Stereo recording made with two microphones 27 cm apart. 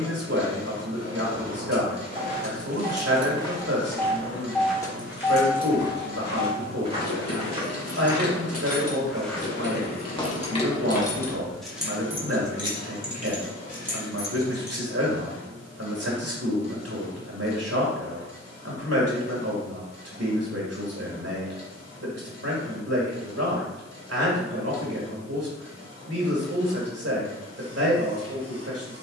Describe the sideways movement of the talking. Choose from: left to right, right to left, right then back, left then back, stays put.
stays put.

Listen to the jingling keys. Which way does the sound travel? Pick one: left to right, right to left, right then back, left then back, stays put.
left then back.